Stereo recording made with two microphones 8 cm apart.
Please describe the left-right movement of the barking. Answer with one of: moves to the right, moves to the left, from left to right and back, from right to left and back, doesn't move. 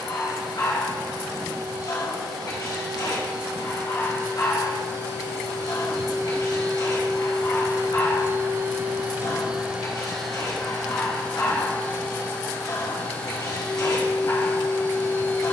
doesn't move.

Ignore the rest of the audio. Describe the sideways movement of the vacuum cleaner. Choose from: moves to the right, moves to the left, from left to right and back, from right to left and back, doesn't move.
moves to the left.